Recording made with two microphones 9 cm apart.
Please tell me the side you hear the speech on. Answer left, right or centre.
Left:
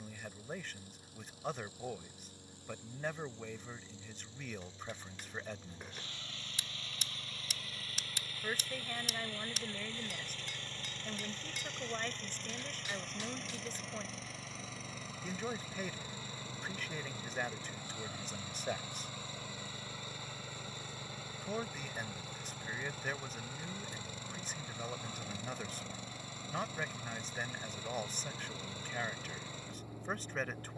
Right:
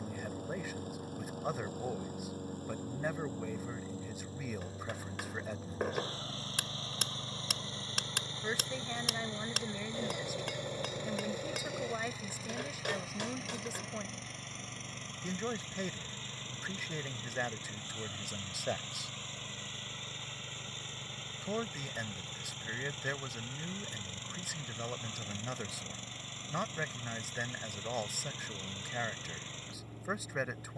centre.